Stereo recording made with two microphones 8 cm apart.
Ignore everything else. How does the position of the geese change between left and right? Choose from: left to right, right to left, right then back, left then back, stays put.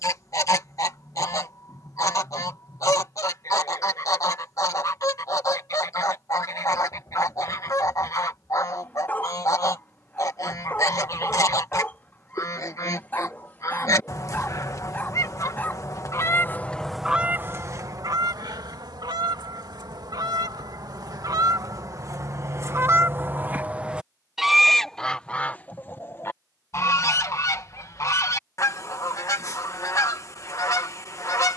right then back.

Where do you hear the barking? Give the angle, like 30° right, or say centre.
20° left.